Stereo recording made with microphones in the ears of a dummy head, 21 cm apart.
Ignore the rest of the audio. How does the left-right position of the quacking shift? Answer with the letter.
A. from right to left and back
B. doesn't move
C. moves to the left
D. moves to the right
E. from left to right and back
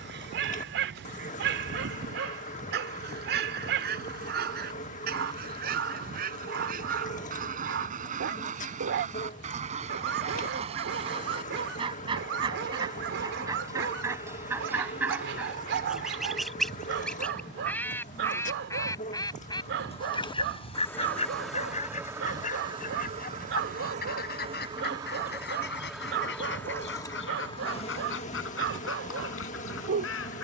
C.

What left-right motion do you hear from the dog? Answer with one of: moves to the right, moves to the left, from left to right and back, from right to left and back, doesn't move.
doesn't move.